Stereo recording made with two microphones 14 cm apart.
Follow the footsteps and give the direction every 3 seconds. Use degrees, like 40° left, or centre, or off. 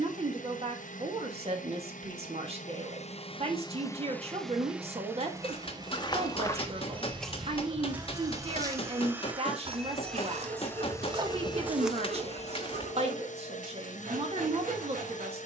off, 40° left, centre, 30° right, 20° left.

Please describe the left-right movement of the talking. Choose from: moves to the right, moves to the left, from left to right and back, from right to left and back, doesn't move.
doesn't move.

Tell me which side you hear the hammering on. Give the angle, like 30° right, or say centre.
40° left.